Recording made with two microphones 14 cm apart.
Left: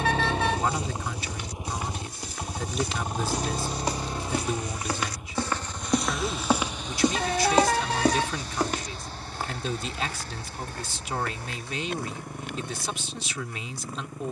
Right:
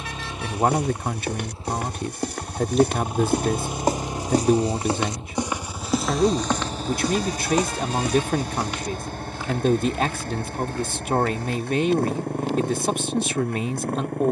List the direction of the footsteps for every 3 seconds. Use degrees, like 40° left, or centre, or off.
70° right, 30° right, 30° left, 60° left, 60° left.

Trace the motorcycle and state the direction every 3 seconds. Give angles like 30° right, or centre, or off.
20° left, 20° right, 40° right, 50° right, 60° right.